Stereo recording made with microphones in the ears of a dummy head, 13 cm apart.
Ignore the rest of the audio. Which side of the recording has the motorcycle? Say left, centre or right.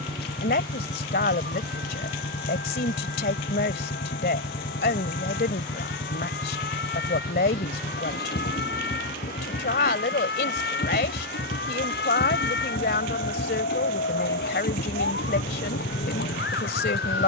left.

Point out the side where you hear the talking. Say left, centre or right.
left.